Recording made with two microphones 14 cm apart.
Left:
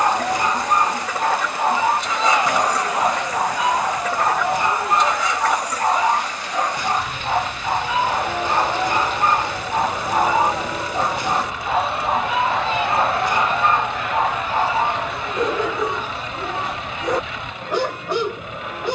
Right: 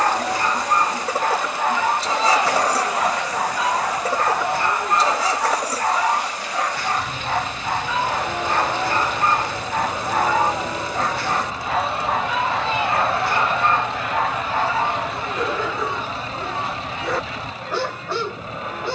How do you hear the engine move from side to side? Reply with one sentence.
In this clip you hear the engine stay put.